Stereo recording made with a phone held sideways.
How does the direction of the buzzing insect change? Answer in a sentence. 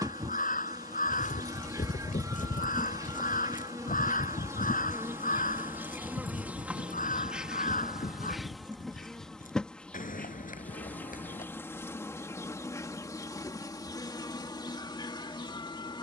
You can hear the buzzing insect travel towards the left.